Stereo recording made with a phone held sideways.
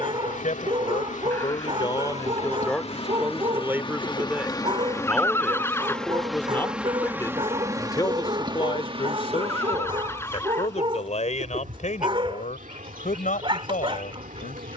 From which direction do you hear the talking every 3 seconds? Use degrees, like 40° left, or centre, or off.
30° left, 10° right, 20° left, 40° left, 60° left.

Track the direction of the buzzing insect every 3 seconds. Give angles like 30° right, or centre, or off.
50° left, 20° left, 20° right, 50° right, 60° right.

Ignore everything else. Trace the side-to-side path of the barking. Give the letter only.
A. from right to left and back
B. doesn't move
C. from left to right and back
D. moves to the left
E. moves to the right
B.